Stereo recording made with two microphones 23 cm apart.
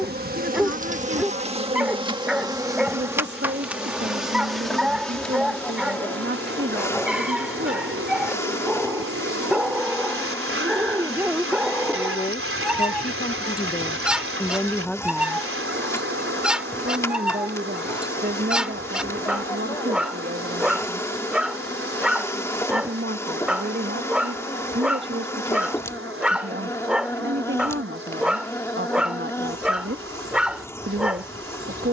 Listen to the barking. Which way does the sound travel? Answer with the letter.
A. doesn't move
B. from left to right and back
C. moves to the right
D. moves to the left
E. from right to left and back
A.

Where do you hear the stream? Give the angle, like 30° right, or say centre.
70° right.